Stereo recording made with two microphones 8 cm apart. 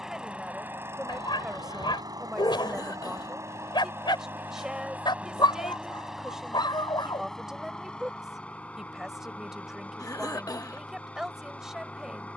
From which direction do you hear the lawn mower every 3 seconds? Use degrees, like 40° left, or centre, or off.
40° right, 20° right, 10° left, 20° left.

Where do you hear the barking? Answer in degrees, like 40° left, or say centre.
70° left.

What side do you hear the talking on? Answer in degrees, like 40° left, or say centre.
10° right.